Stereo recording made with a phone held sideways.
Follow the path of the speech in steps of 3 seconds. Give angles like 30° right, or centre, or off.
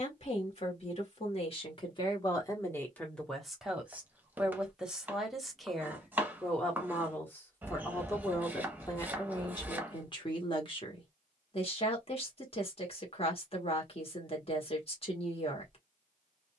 40° left, centre, 20° left, 40° left, 40° left, 40° left.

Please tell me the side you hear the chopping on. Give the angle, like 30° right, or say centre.
10° right.